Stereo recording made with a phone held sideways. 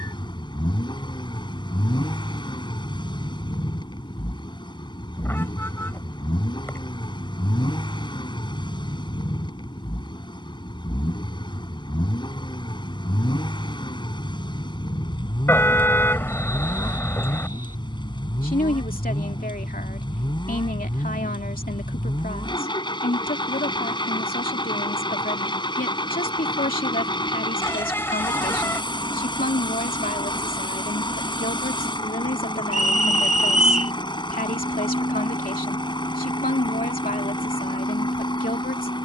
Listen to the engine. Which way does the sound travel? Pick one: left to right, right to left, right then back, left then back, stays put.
stays put.